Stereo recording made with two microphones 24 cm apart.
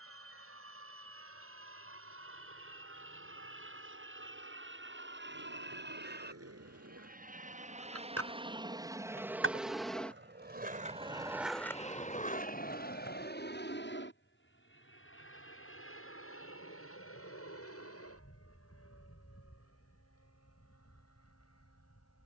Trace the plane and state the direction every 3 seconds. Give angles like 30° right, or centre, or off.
70° right, 60° right, 30° right, 10° left, 40° left, 60° left, 70° left, 70° left.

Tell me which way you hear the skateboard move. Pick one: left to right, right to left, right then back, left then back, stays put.
right to left.